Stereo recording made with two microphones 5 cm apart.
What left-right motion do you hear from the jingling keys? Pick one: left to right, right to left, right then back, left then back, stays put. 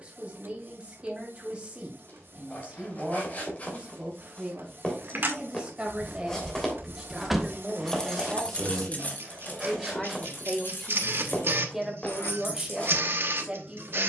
right to left.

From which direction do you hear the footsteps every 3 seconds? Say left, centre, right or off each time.
left, left, centre, centre, left.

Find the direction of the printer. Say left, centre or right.
right.